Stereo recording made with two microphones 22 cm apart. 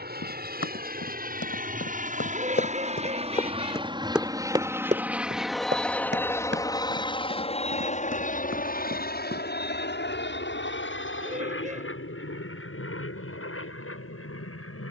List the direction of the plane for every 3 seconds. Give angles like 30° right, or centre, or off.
40° right, 10° right, 30° left, 50° left, 60° left.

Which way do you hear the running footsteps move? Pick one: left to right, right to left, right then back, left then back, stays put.
left to right.